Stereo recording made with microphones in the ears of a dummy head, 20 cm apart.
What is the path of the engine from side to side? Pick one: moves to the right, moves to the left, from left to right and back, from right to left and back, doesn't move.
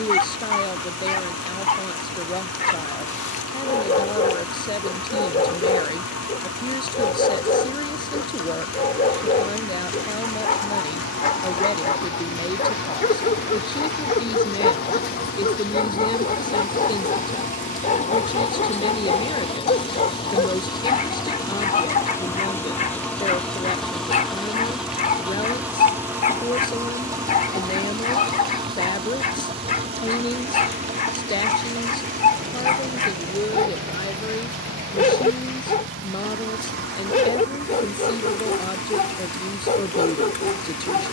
moves to the right.